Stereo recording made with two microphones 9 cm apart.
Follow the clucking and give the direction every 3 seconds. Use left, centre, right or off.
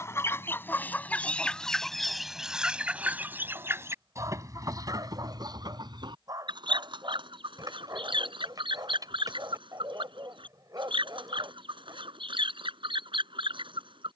centre, right, right, right, right.